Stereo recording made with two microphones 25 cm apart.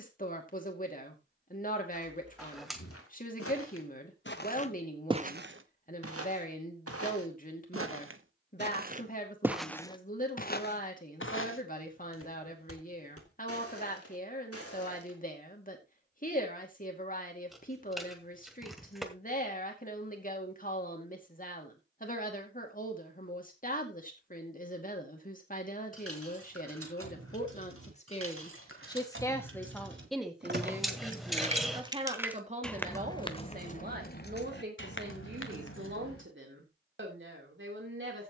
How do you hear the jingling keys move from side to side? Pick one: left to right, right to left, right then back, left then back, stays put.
right to left.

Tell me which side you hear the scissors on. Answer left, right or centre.
centre.